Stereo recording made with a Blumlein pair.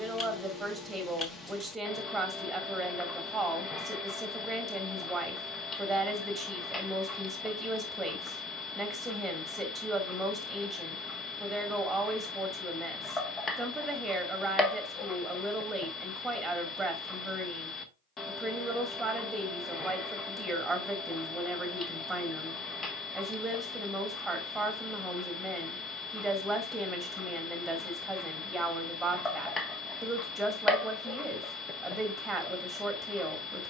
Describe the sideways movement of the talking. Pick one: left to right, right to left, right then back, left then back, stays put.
stays put.